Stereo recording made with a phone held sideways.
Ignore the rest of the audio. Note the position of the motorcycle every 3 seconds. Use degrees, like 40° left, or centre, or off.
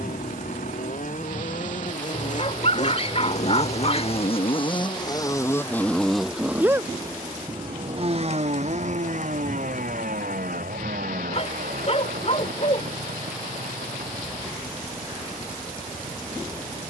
60° left, 40° left, 30° right, 60° right, 70° right, 80° right.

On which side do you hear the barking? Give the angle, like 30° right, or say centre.
40° left.